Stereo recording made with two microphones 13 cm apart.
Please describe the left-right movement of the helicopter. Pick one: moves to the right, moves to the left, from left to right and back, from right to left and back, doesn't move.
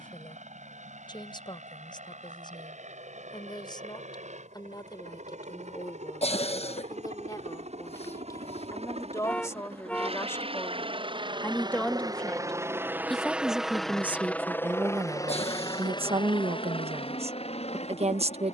moves to the left.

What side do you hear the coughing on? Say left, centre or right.
left.